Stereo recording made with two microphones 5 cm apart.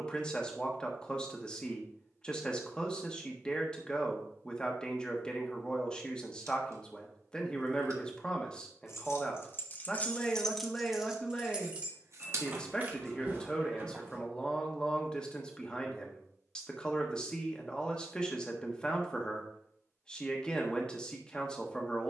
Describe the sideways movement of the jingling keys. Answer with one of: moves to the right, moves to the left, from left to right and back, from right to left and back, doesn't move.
moves to the right.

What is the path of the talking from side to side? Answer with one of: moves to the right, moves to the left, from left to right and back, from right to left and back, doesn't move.
doesn't move.